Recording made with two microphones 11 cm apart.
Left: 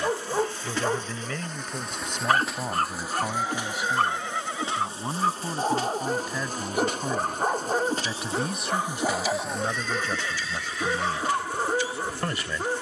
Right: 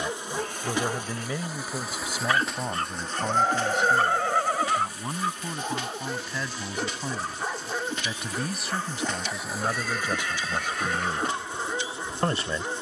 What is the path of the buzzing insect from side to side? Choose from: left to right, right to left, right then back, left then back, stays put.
left then back.